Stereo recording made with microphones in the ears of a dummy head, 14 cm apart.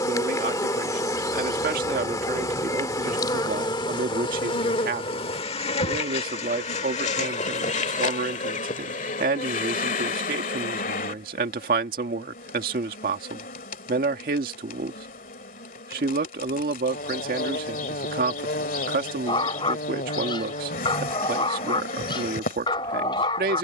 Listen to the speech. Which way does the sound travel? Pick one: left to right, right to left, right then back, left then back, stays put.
stays put.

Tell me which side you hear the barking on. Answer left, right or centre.
left.